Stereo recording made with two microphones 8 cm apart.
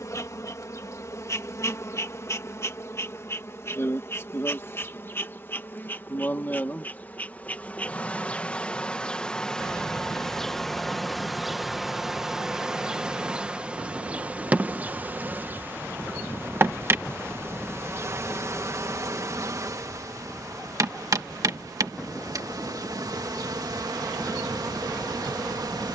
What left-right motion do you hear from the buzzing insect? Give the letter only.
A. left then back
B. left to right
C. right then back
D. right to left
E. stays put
B.